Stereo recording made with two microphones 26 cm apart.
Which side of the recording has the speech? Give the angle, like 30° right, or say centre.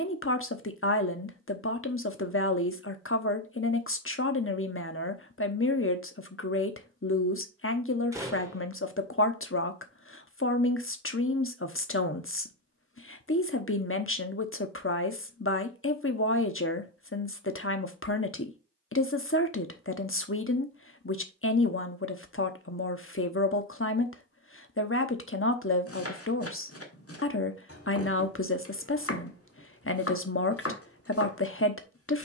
50° left.